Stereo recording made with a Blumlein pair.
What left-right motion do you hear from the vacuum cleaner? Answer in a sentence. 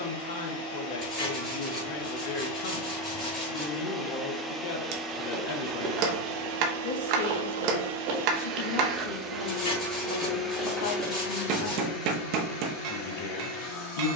You can hear the vacuum cleaner go right and come back.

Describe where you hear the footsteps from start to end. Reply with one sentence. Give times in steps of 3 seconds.
You can hear the footsteps not at all from 0 s, in the centre from 3 s, on the right from 6 s, in the centre from 9 s and not at all from 12 s.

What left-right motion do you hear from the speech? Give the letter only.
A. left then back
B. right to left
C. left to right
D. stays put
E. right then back
D.